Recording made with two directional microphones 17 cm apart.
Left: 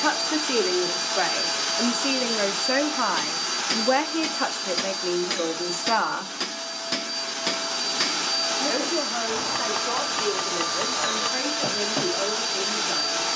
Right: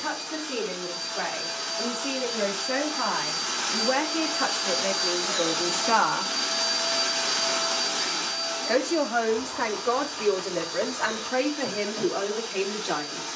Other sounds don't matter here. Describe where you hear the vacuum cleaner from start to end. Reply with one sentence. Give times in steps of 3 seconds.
In this clip you hear the vacuum cleaner on the left from 0 s, in the centre from 3 s and on the left from 9 s.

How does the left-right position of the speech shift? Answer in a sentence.
In this clip you hear the speech move from left to right.